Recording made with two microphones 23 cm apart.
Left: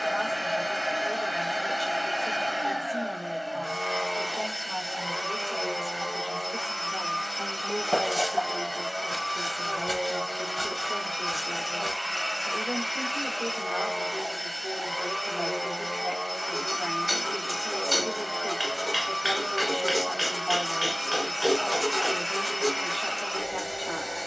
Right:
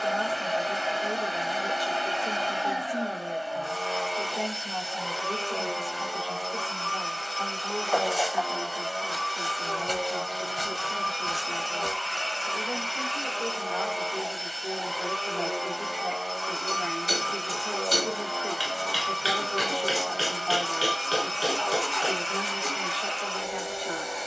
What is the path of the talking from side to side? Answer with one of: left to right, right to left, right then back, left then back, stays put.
left then back.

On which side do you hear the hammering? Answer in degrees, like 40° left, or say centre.
40° right.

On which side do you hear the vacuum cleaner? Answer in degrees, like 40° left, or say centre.
10° left.